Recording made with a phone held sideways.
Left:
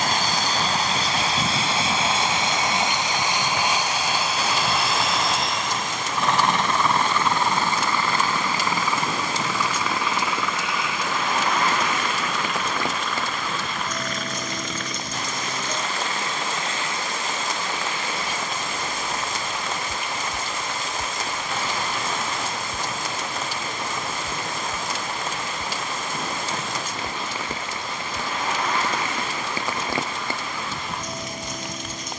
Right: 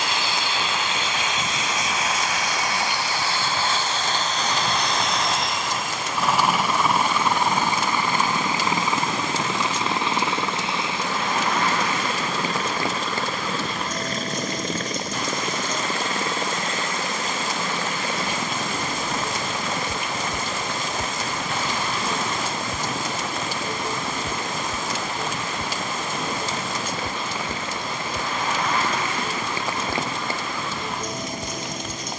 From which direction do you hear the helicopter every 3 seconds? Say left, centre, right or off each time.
left, centre, centre, right, right, right, right, right, right, right, right.